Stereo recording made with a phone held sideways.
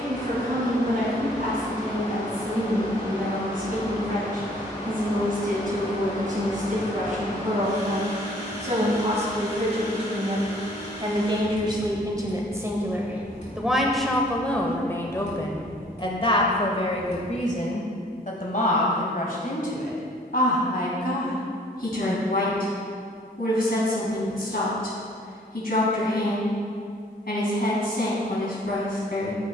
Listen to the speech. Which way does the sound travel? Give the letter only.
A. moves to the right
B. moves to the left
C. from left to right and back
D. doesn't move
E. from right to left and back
B.